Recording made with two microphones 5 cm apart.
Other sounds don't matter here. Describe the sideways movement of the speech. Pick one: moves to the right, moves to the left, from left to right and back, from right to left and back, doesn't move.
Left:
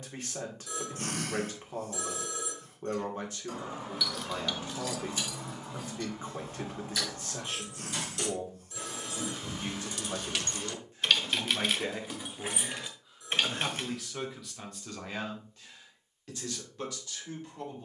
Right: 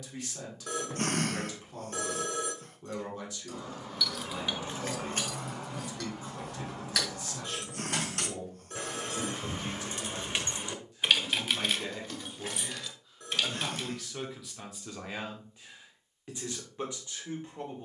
moves to the right.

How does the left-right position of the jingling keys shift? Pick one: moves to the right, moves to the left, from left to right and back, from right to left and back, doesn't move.
from left to right and back.